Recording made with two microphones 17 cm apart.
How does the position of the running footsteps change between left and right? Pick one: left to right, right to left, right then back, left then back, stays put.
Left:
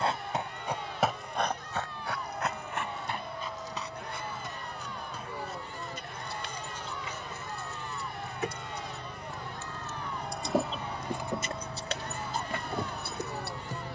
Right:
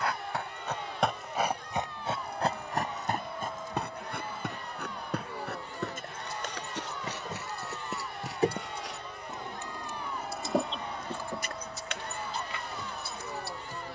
left to right.